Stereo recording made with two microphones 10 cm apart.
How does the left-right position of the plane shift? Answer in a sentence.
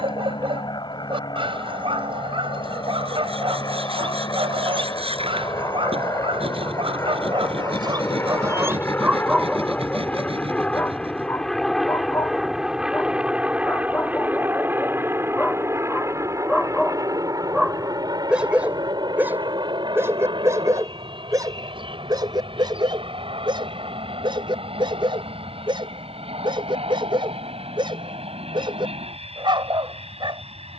You can hear the plane move from left to right.